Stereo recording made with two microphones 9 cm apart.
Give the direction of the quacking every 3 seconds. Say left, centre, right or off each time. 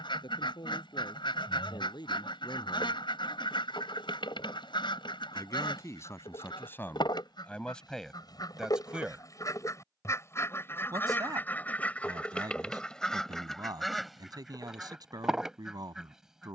left, left, left, left, centre, centre.